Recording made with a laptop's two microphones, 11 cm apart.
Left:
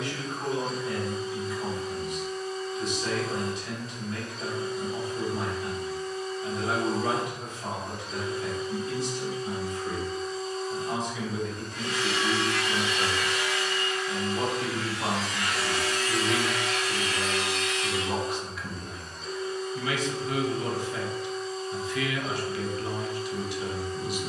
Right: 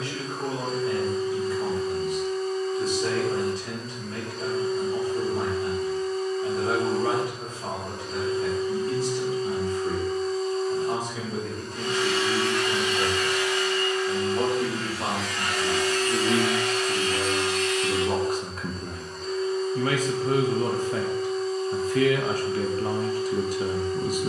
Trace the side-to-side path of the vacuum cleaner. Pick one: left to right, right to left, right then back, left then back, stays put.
stays put.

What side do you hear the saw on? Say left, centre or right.
right.